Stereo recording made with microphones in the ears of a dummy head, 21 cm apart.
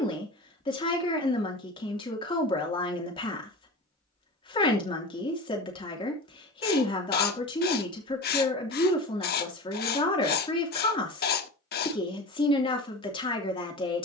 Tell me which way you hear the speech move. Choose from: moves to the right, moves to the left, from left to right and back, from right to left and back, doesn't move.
doesn't move.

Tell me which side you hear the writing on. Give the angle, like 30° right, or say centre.
40° left.